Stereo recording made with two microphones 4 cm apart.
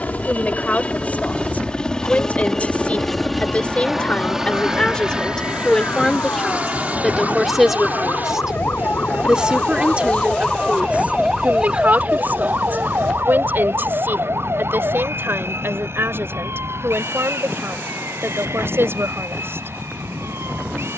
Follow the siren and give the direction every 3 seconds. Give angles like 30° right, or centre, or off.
70° left, 70° left, 60° left, 20° left, 50° right, 70° right, 80° right.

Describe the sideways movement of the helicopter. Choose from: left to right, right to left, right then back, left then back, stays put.
left to right.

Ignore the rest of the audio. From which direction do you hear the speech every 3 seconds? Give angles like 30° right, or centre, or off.
40° left, 20° left, centre, 30° right, 50° right, 60° right, 70° right.